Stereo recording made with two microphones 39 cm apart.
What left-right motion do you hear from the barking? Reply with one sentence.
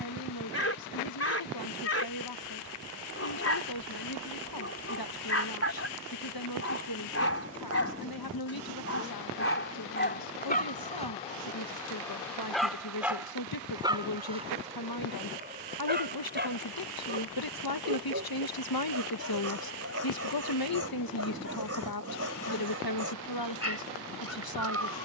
In this clip you hear the barking travel towards the right.